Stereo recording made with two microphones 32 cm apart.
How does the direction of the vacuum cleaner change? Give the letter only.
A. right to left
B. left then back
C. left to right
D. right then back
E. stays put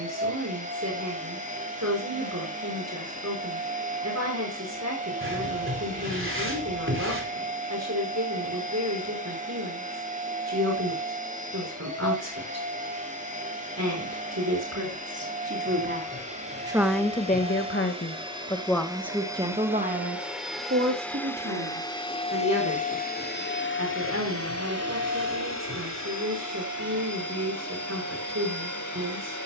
A.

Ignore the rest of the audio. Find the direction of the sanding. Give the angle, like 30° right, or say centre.
40° right.